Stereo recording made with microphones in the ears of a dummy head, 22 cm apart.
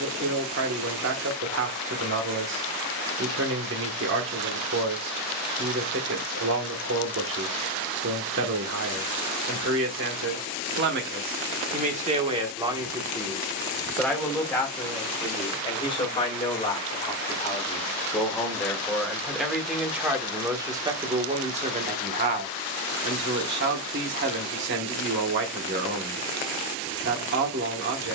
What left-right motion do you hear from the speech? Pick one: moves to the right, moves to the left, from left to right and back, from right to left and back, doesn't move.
from right to left and back.